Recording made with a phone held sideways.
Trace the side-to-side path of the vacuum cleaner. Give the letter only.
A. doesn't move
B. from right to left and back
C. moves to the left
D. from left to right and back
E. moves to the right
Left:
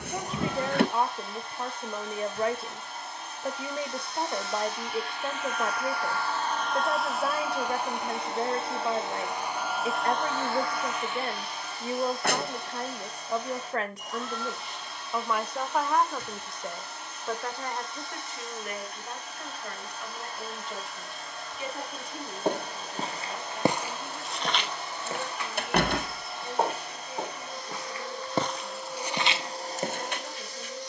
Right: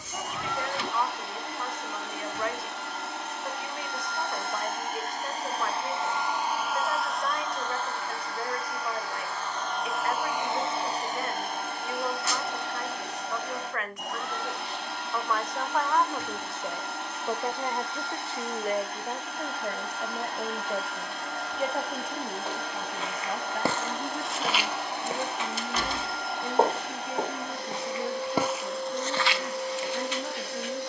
B.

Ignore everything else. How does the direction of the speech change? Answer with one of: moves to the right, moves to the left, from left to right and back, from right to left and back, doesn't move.
moves to the right.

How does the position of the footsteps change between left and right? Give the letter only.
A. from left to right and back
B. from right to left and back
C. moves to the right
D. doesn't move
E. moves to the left
A.